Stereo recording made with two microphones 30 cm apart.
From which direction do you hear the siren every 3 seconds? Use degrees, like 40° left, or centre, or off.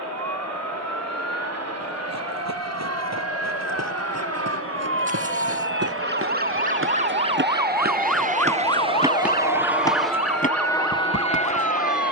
60° right, 50° right, 10° right, 50° left.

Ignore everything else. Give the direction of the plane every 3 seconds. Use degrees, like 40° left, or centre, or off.
70° right, 60° right, 40° right, 10° left.